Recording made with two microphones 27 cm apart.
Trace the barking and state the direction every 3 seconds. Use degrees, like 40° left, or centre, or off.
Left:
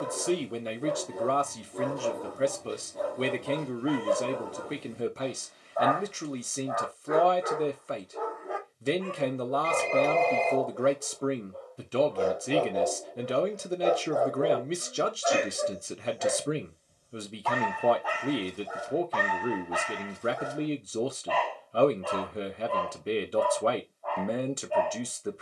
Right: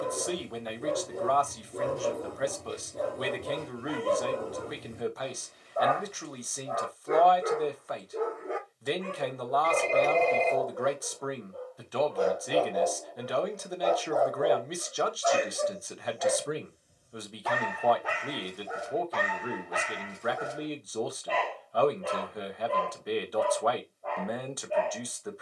30° right, 30° right, 30° right, 10° right, 10° left, 10° right, 30° right, 30° right, 30° right.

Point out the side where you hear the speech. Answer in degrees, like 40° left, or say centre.
30° left.